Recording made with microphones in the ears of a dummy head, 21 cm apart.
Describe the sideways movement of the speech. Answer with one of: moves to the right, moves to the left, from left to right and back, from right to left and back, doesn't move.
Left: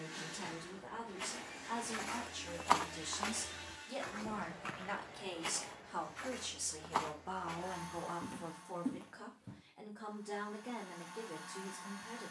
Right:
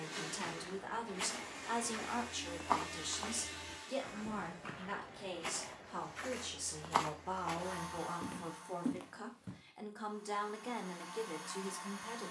from right to left and back.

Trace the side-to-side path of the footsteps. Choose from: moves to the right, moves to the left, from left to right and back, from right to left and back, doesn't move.
from right to left and back.